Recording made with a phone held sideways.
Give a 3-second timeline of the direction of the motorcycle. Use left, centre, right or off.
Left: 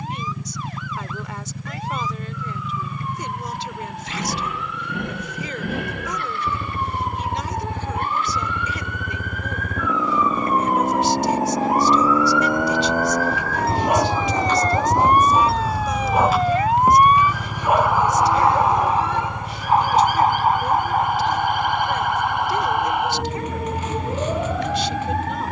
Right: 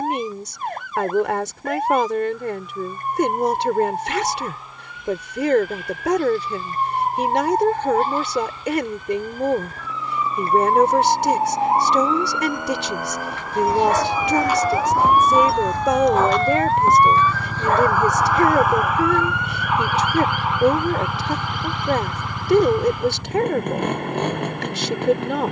left, left, left, left, left, centre, right, right, right.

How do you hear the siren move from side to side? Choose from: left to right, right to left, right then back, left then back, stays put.
right to left.